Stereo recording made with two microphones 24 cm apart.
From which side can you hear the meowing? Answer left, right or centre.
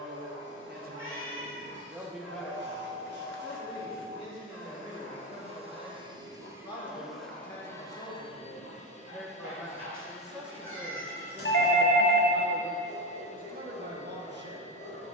left.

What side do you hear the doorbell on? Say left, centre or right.
left.